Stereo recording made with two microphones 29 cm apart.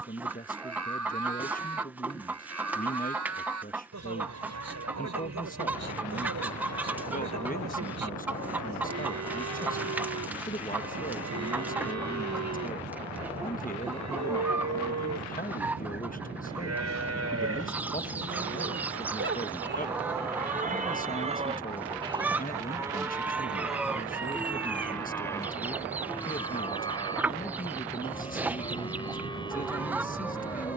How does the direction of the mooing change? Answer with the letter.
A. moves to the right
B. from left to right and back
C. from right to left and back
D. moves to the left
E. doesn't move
D.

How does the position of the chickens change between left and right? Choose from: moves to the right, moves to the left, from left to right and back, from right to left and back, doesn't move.
doesn't move.